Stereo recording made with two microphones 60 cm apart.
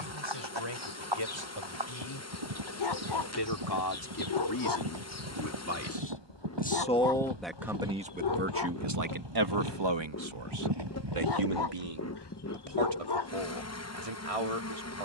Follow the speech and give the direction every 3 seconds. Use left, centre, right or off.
left, left, centre, right, right.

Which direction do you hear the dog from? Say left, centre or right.
left.